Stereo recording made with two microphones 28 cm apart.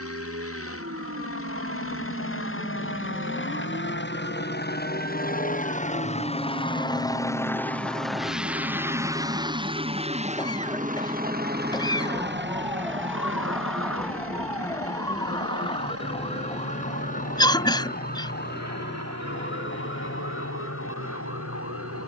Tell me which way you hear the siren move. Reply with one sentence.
In this clip you hear the siren travel towards the left.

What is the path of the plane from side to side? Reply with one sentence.
You can hear the plane move to the right.